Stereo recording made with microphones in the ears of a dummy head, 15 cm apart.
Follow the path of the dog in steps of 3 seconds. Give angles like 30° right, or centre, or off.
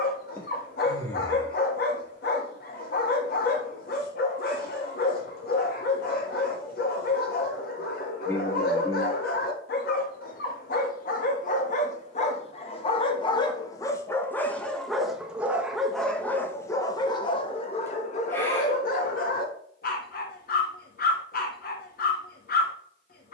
60° left, 60° left, 60° left, 60° left, 20° left, 10° left, 50° left, 60° left.